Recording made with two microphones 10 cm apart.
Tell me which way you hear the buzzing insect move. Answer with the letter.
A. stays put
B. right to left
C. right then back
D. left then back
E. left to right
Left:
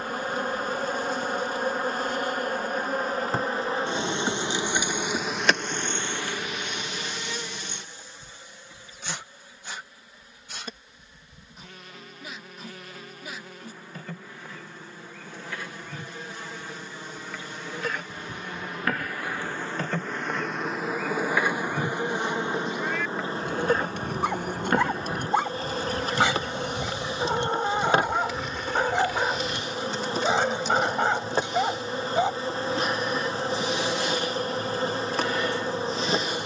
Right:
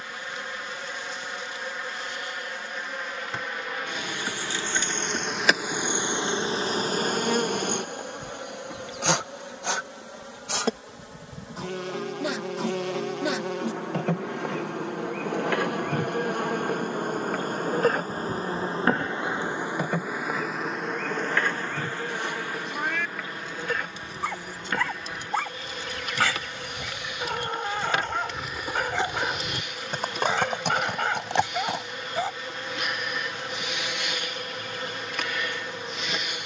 C.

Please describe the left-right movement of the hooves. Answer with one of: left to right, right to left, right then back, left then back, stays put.
left to right.